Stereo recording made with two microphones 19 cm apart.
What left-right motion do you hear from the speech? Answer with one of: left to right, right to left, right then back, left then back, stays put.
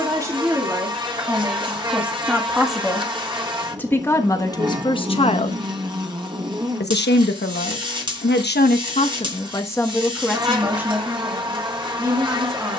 left then back.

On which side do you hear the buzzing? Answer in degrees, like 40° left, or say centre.
20° right.